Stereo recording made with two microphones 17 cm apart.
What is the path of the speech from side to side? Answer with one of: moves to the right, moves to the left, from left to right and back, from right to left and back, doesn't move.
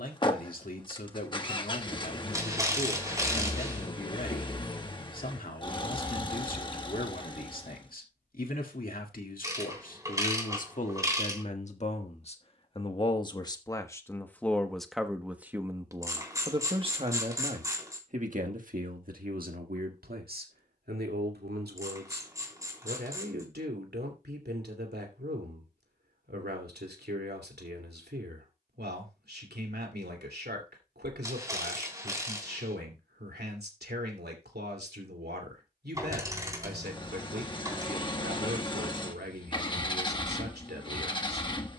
moves to the right.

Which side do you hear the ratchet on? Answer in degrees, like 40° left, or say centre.
20° right.